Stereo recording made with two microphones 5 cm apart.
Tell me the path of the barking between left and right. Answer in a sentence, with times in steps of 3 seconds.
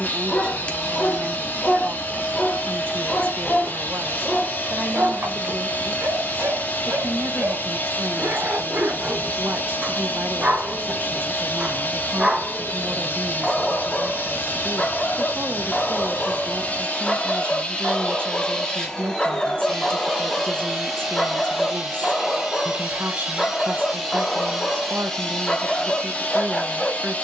In this clip you hear the barking on the left from 0 s, in the centre from 3 s, on the right from 6 s, in the centre from 12 s and on the left from 15 s.